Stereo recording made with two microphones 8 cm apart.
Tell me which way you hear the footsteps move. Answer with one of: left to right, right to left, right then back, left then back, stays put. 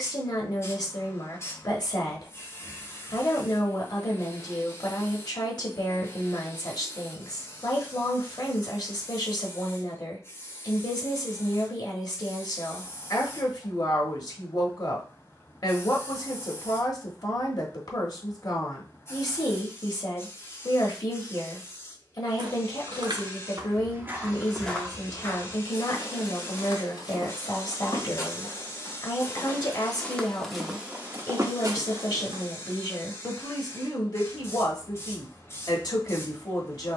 left then back.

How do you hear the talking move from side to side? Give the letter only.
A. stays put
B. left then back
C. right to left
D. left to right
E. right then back
A.